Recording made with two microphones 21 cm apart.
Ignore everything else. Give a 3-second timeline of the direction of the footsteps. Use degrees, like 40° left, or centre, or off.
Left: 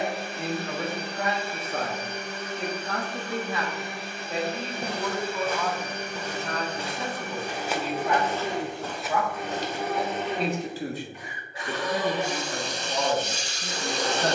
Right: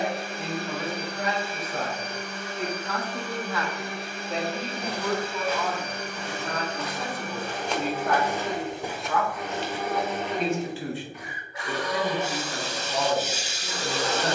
off, 50° left, 10° left, 30° left, off.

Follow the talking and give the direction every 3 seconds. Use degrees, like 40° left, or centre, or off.
50° left, 10° left, centre, 40° left, 60° left.